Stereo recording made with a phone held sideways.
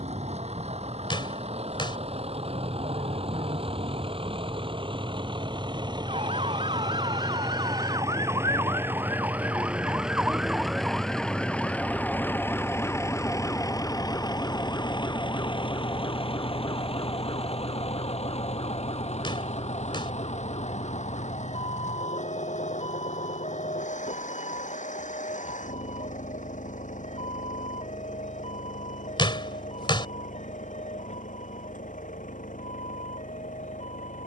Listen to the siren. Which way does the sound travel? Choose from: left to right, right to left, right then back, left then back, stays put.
right to left.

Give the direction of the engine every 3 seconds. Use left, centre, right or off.
right, right, right, centre, left, left, left, left, left, left, left, left.